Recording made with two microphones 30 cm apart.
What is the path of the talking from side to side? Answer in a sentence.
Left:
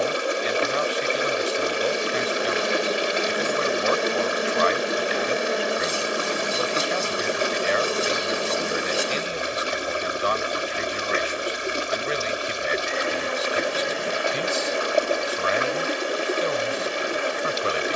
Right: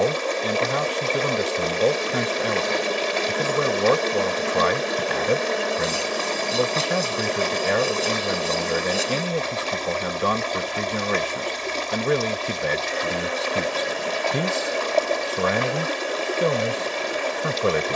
You can hear the talking stay in one place.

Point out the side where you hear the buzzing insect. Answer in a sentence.
In this clip you hear the buzzing insect in the centre.